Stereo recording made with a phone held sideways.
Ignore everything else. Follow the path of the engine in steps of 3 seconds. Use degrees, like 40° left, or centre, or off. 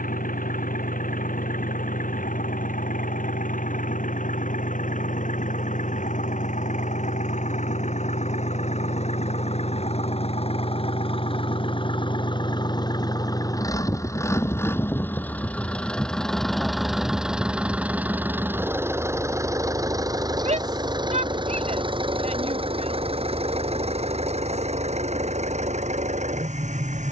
70° left, 60° left, 50° left, 40° left, 20° left, centre, 20° right, 40° right, 50° right.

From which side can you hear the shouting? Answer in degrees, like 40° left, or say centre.
50° right.